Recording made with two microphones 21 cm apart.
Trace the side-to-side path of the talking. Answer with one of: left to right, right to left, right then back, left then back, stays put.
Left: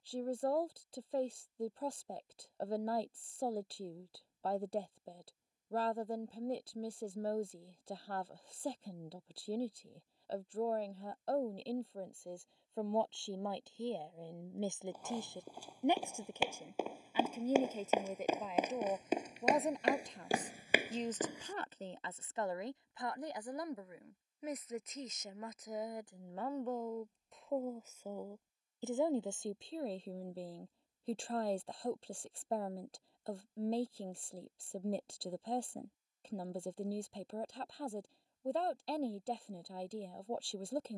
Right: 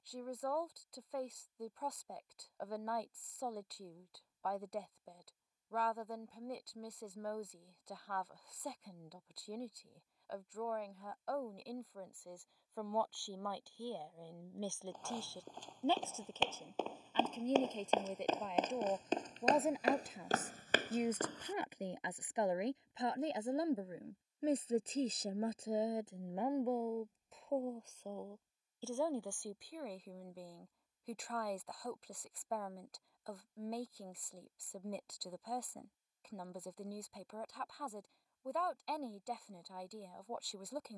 right then back.